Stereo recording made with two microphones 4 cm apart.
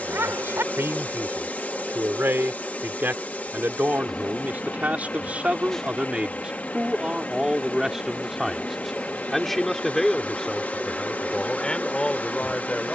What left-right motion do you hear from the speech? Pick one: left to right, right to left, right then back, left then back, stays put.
right to left.